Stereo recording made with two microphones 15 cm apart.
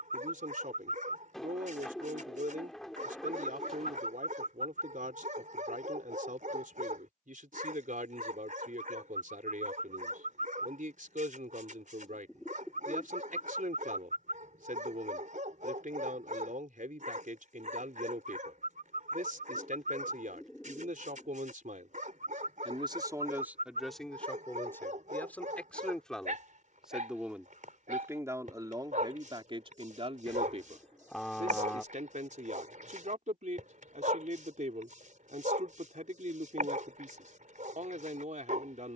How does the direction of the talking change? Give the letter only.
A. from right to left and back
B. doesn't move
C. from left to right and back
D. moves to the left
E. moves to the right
A.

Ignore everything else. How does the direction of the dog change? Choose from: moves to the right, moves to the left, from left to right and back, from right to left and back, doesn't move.
doesn't move.